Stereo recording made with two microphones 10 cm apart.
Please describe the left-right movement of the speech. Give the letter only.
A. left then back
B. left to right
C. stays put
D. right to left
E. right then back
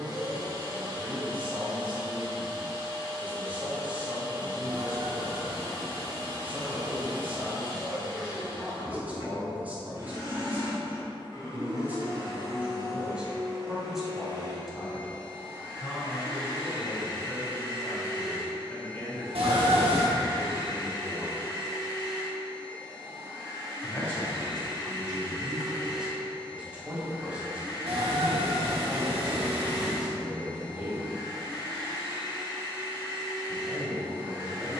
A.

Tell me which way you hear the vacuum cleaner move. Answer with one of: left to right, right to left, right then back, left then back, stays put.
stays put.